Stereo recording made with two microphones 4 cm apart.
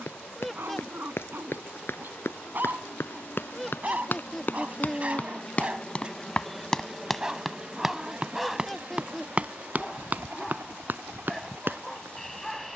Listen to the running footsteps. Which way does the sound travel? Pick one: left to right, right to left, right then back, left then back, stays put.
left to right.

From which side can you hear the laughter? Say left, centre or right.
centre.